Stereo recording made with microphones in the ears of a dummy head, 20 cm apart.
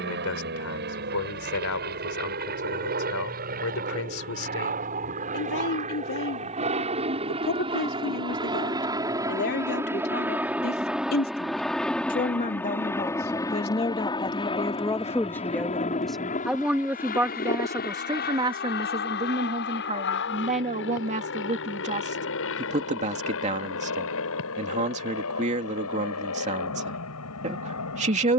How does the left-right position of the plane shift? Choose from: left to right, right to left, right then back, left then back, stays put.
right to left.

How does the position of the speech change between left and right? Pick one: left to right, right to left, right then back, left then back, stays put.
left to right.